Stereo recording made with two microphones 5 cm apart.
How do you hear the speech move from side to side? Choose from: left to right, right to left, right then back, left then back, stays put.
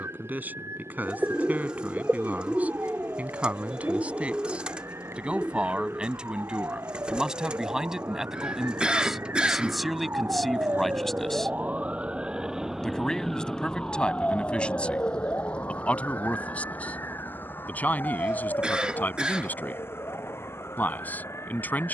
right to left.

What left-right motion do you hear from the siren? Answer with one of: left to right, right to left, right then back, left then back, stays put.
right to left.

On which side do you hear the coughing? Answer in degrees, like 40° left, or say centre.
20° right.